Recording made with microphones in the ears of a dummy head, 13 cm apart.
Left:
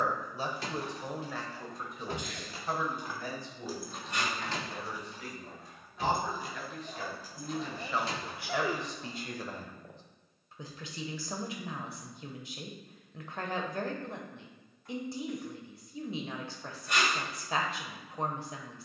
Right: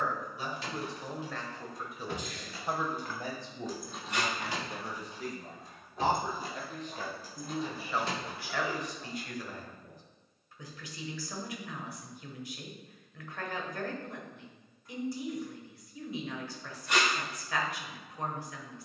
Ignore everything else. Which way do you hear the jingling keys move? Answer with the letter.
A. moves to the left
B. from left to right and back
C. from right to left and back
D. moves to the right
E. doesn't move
D.